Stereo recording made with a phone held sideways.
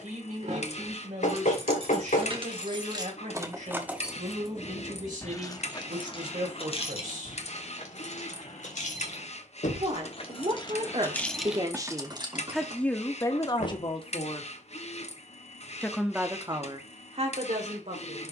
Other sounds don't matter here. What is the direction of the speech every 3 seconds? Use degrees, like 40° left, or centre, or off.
70° right, 70° right, 70° right, 50° right, 20° left, 40° right.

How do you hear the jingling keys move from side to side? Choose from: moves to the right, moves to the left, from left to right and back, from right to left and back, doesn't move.
from right to left and back.